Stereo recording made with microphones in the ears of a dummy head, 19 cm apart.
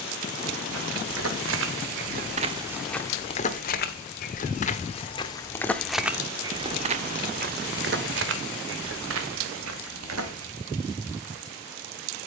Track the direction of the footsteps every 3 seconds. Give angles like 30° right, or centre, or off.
40° right, 30° left, 40° right, 70° right.